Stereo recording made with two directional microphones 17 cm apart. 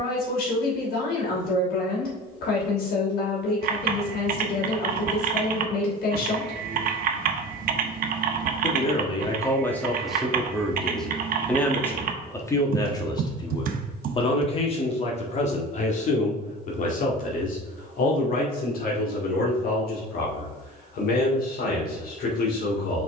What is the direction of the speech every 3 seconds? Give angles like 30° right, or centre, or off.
70° left, 70° left, 50° left, 10° left, 30° left, 50° left, 60° left, 60° left.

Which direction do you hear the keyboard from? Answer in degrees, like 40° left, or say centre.
60° right.